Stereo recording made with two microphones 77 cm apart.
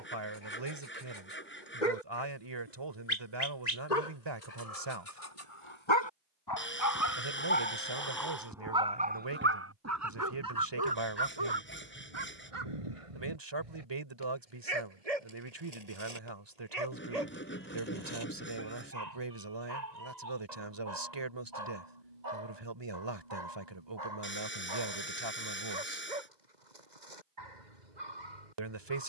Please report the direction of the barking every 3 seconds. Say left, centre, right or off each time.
left, left, centre, right, right, right, right, right, right, right.